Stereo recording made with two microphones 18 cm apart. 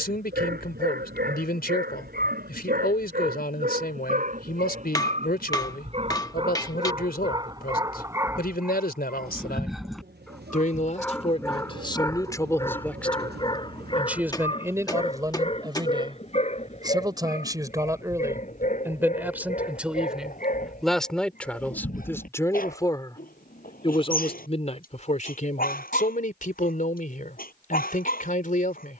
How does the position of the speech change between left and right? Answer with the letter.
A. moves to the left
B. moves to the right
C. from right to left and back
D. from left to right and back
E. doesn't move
D.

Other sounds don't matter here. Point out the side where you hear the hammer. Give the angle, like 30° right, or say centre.
20° left.